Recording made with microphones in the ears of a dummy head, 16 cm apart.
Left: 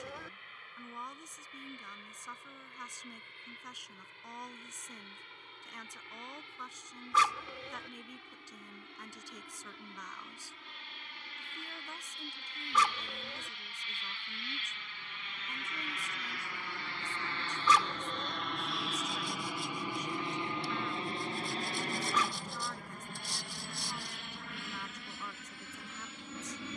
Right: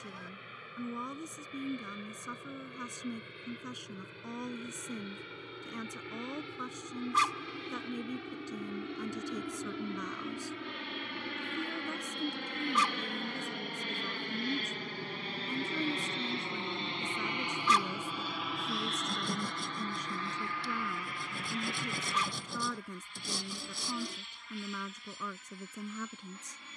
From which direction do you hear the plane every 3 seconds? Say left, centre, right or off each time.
right, right, right, right, right, right, centre, left, left.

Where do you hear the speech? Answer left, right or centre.
right.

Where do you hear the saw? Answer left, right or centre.
right.